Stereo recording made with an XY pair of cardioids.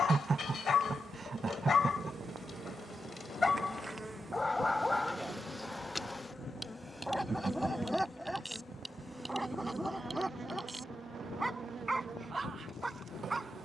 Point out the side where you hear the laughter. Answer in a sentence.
In this clip you hear the laughter on the right.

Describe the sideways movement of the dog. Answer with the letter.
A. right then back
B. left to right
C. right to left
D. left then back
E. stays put
B.